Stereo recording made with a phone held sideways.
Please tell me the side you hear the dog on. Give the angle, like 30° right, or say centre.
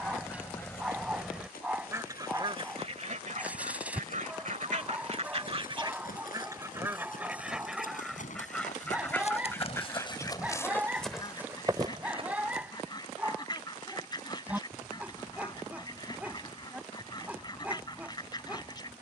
10° right.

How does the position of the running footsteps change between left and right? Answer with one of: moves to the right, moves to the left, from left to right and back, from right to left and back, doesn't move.
moves to the right.